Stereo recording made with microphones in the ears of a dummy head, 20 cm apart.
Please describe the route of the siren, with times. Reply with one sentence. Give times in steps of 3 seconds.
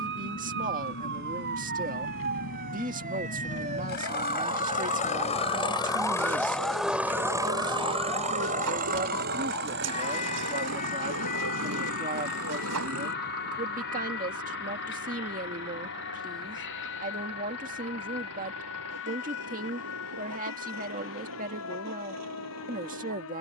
You can hear the siren on the right from 0 s, in the centre from 6 s and on the left from 9 s.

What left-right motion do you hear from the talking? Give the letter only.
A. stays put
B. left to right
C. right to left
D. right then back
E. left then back
A.